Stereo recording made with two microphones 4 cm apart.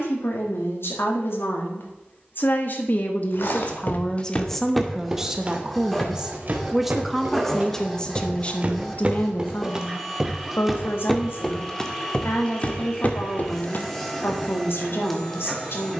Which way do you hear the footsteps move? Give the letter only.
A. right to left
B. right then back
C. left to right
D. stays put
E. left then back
B.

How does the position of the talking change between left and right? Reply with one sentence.
You can hear the talking go right and come back.